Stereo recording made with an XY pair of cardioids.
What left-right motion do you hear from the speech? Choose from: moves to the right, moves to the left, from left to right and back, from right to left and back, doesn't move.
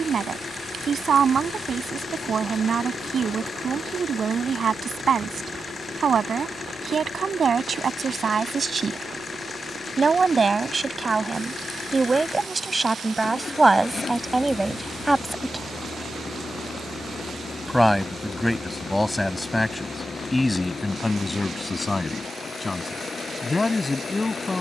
moves to the left.